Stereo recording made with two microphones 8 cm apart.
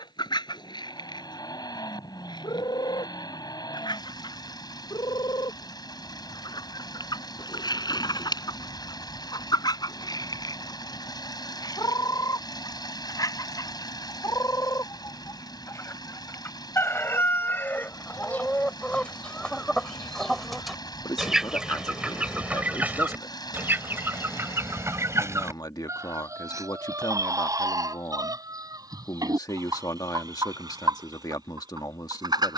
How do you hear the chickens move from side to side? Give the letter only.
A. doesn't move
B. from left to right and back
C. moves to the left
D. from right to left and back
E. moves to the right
E.